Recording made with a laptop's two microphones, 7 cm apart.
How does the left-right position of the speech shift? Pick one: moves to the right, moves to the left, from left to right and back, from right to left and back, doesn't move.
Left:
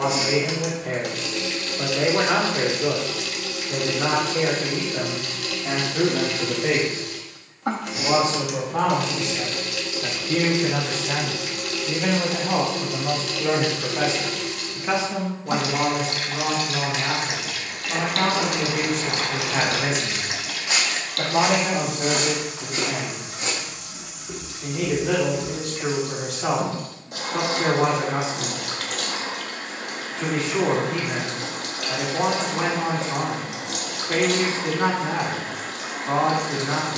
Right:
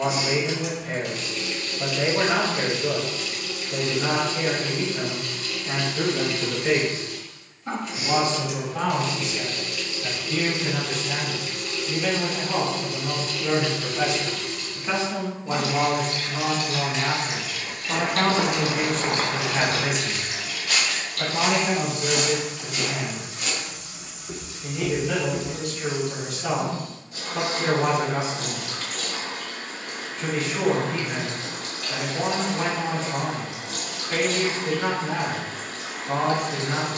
from left to right and back.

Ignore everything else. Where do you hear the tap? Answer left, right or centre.
left.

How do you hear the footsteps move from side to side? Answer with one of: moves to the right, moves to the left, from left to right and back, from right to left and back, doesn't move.
from right to left and back.